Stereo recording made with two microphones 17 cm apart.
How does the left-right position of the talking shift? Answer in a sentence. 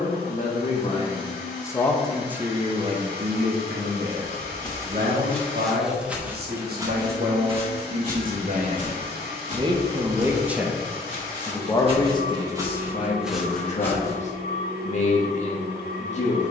In this clip you hear the talking move from left to right and back again.